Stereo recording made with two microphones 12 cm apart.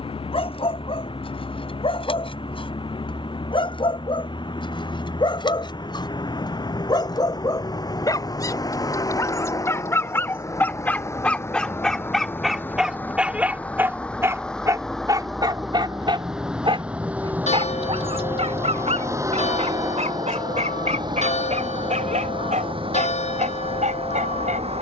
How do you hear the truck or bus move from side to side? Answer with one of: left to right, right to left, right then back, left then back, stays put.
left to right.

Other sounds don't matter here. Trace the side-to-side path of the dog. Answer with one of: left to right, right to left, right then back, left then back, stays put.
left to right.